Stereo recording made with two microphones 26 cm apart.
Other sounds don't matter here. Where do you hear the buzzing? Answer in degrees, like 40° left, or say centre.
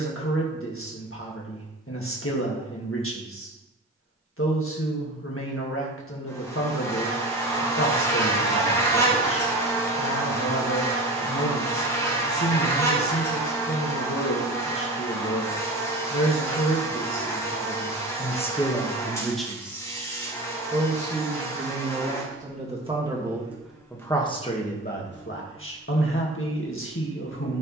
10° left.